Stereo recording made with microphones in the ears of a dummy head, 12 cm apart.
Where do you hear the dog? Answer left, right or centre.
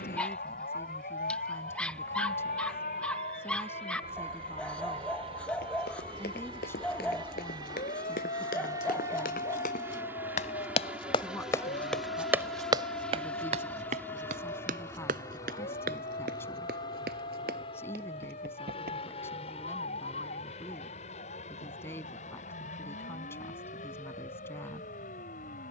centre.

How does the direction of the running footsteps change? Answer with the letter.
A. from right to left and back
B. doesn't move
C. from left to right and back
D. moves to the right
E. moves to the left
D.